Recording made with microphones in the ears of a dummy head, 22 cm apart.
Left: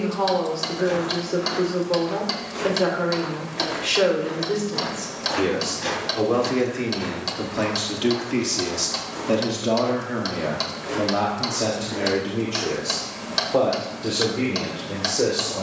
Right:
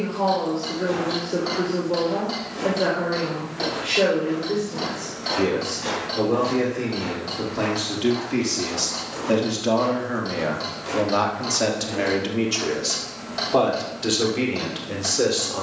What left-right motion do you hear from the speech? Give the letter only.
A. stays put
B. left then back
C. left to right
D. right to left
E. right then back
C.